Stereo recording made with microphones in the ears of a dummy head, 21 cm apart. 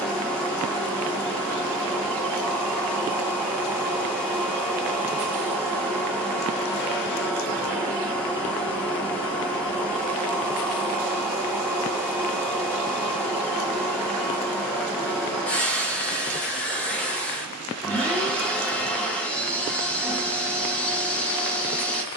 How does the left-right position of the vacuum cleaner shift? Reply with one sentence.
You can hear the vacuum cleaner stay put.